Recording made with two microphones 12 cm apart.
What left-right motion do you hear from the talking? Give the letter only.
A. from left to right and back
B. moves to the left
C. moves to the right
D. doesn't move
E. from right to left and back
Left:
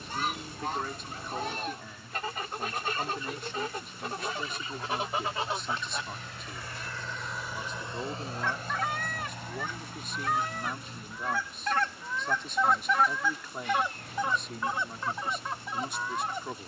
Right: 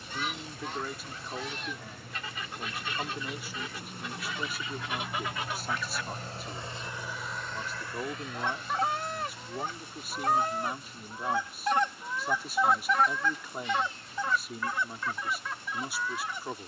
D.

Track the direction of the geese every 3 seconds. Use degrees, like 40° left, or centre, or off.
50° left, 40° left, 20° right, 30° right, 10° left, 40° left.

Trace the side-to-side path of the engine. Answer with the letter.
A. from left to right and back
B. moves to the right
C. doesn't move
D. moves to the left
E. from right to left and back
D.